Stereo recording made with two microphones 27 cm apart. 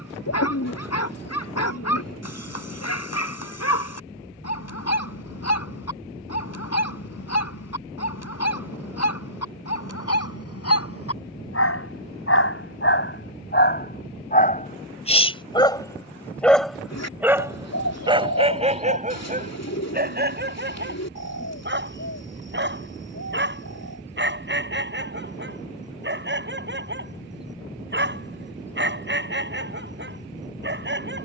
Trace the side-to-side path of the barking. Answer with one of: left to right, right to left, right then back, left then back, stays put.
left to right.